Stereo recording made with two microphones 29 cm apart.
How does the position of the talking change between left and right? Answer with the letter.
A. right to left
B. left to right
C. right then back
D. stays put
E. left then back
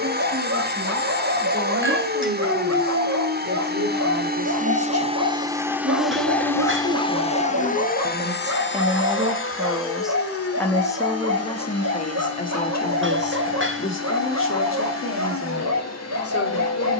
A.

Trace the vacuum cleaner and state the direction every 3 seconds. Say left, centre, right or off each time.
right, right, left, left, left, left.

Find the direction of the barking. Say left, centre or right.
right.